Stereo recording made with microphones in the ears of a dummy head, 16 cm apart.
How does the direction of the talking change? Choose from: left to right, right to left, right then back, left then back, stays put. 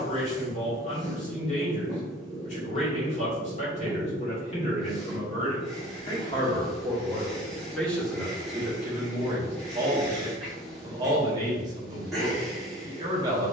left to right.